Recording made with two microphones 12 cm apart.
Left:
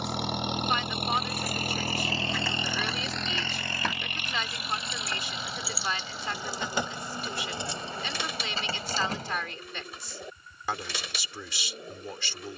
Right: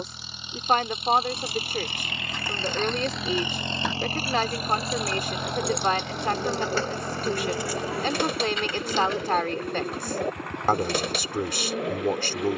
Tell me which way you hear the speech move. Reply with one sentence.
You can hear the speech stay in one place.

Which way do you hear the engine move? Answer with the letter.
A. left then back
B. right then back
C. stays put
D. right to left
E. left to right
E.